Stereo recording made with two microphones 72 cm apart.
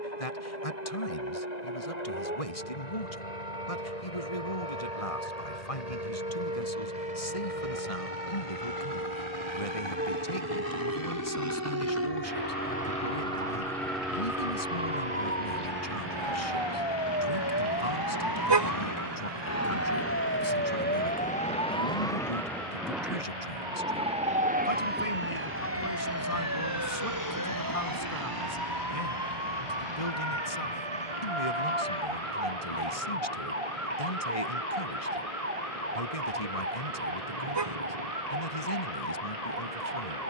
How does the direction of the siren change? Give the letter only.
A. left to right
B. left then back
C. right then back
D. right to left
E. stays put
A.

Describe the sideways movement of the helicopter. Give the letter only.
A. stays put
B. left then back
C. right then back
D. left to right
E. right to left
D.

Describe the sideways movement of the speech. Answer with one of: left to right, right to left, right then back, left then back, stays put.
stays put.